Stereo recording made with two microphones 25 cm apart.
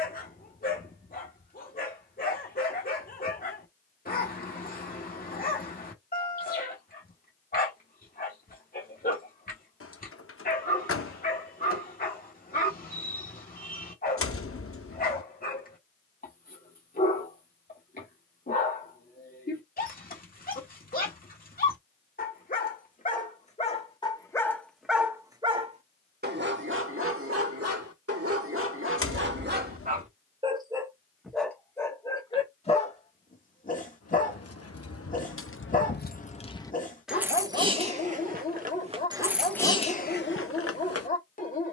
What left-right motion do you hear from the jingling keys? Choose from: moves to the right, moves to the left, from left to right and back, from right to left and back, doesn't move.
from left to right and back.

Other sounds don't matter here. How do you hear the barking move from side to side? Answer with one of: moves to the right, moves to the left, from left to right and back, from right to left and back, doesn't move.
from left to right and back.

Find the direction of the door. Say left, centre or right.
left.